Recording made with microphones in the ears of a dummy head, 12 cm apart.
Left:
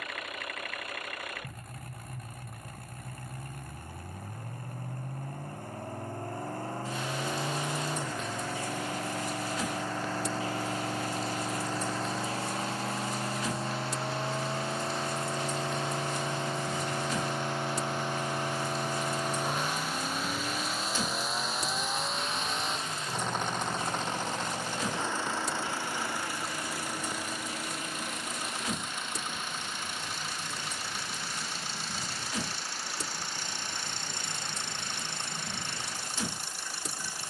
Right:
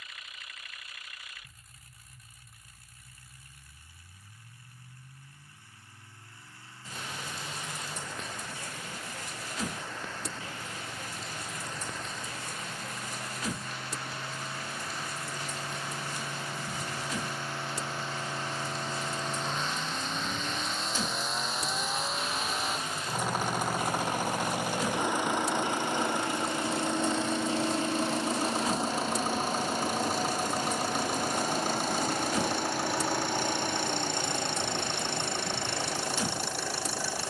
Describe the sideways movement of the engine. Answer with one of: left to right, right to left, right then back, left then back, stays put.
left to right.